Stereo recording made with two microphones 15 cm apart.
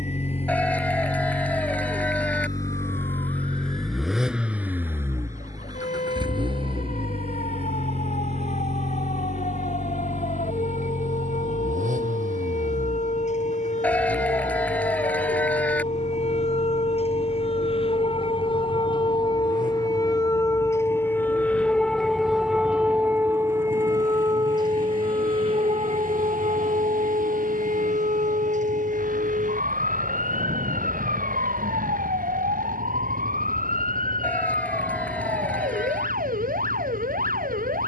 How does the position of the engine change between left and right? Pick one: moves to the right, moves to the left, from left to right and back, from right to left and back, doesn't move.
moves to the right.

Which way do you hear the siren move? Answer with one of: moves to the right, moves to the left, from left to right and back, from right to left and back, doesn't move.
moves to the right.